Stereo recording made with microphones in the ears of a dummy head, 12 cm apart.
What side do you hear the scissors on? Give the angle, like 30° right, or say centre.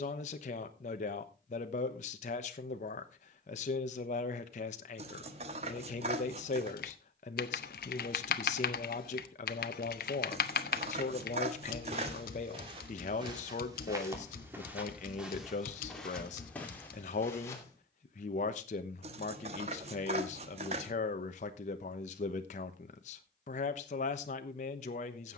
50° right.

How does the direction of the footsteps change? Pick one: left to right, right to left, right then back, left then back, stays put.
right to left.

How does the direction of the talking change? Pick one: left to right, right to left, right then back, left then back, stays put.
stays put.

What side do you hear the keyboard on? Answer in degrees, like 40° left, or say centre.
70° left.